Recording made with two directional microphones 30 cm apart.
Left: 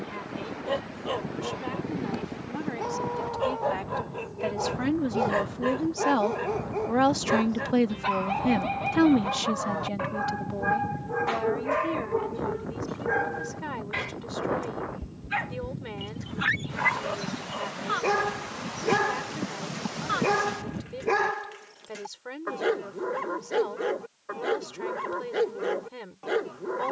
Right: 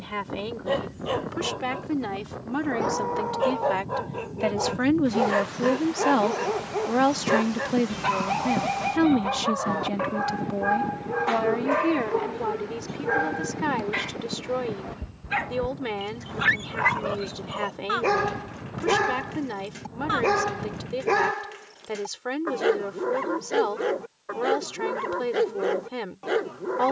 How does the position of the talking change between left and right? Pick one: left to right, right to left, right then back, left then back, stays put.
left then back.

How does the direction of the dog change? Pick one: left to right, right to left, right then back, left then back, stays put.
stays put.